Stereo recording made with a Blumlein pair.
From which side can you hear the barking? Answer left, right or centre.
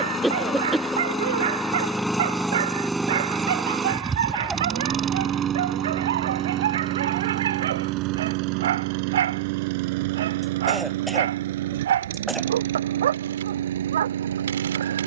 right.